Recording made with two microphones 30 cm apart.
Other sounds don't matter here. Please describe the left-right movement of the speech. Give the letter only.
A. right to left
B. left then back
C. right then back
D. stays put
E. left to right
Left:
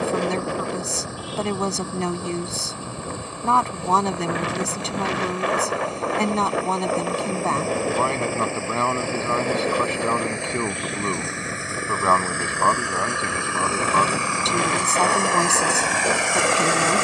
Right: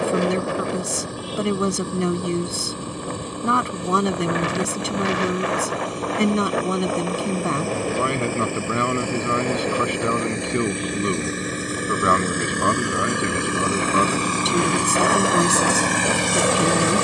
D.